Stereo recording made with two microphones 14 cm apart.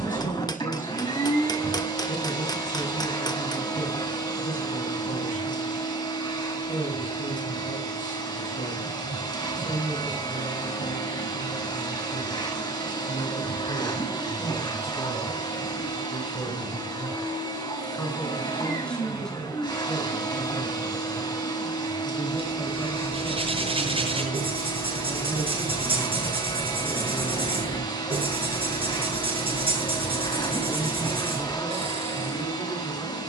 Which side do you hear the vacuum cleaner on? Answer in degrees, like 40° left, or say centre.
30° left.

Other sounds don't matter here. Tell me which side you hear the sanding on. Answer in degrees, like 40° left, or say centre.
40° right.